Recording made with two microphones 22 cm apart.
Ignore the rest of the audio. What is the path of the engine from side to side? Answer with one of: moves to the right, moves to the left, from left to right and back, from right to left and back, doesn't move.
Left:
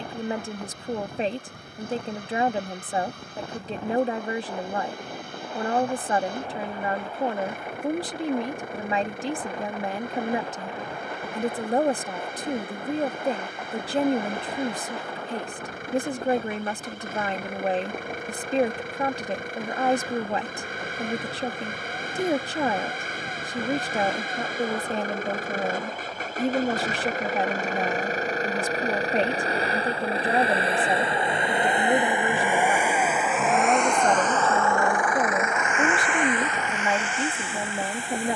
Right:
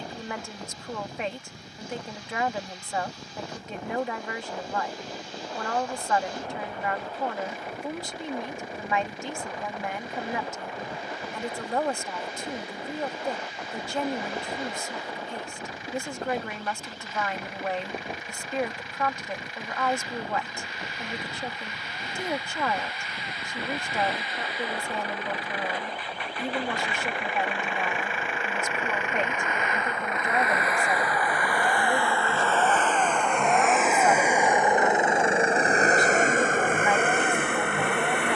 moves to the right.